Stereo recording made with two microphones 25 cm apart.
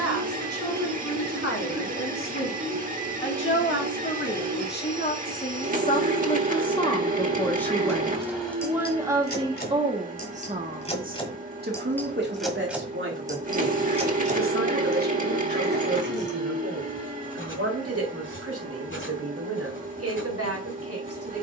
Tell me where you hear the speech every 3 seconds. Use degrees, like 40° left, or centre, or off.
60° left, 40° left, 10° left, 30° right, 50° right, 60° right, 70° right.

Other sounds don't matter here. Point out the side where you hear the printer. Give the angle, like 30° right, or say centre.
30° right.